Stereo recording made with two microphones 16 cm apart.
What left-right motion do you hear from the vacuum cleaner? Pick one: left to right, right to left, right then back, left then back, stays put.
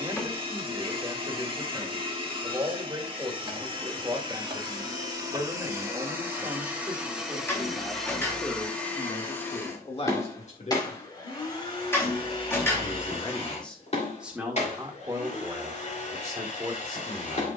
right to left.